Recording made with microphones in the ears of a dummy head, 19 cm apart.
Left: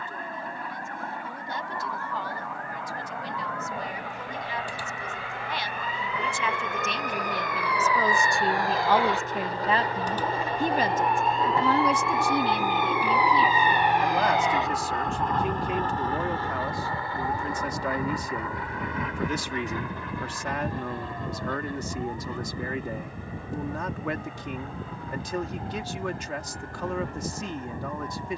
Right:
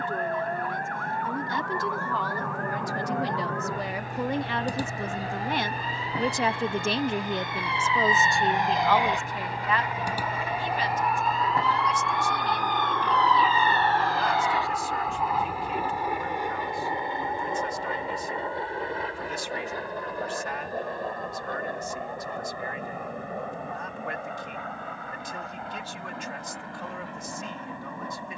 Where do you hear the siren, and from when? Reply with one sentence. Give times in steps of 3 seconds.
In this clip you hear the siren on the right from 0 s, in the centre from 9 s and on the left from 15 s.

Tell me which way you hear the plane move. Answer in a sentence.
You can hear the plane travel towards the right.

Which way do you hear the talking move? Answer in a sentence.
In this clip you hear the talking move from right to left.